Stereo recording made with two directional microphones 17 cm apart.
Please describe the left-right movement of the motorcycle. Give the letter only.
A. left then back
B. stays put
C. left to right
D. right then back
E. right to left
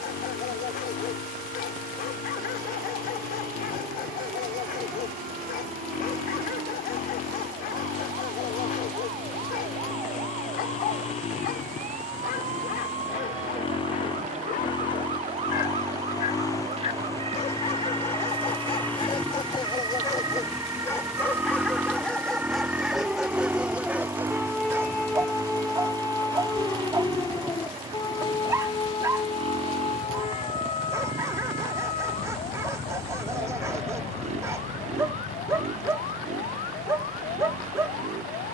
C.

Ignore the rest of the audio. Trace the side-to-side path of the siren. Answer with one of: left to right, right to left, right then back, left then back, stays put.
right to left.